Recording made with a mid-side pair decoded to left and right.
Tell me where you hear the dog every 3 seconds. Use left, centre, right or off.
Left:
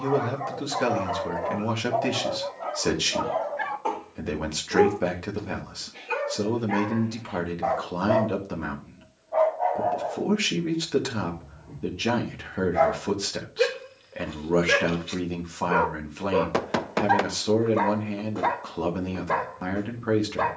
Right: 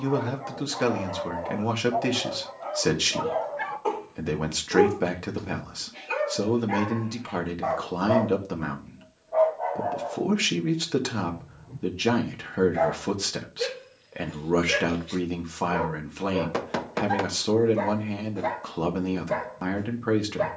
left, centre, centre, left, left, left, left.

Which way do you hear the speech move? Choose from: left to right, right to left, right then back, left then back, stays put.
stays put.